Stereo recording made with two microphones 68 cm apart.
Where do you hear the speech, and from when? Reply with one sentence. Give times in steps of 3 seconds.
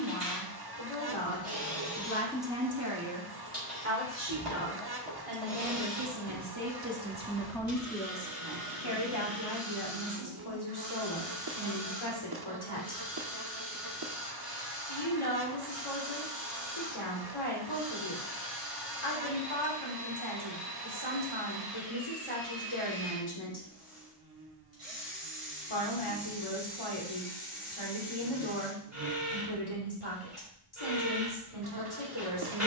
In this clip you hear the speech on the left from 0 s, on the right from 3 s, in the centre from 6 s and on the left from 9 s.